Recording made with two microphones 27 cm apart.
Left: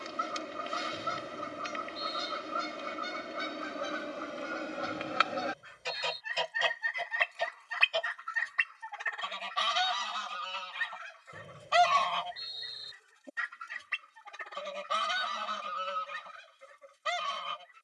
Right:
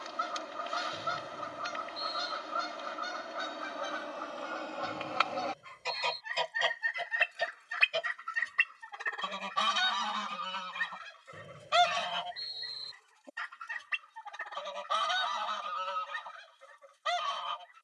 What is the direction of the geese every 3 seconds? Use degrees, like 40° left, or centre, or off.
30° left, 20° left, 10° right, 50° right, 20° left, 30° left.